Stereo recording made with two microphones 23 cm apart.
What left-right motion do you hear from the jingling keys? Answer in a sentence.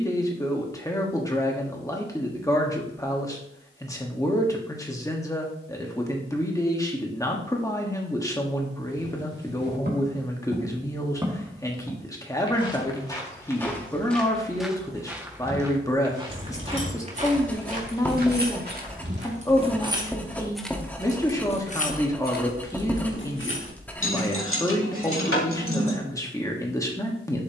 In this clip you hear the jingling keys move to the left.